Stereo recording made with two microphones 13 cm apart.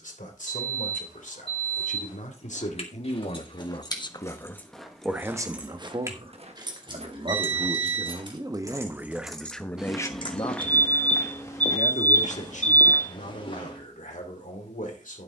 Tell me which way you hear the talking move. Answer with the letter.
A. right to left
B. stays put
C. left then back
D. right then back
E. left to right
D.